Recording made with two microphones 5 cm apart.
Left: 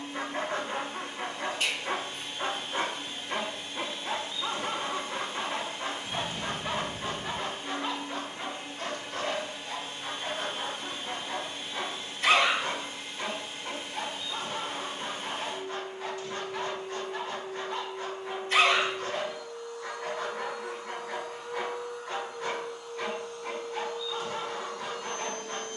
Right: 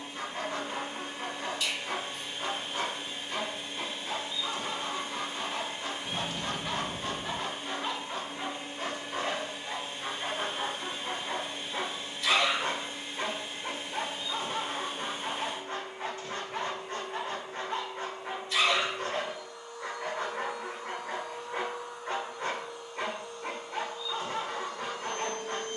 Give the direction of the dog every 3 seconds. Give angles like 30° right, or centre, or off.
40° left, 40° left, 10° left, 20° right, 30° right, 30° right, 30° right, 30° right, 30° right.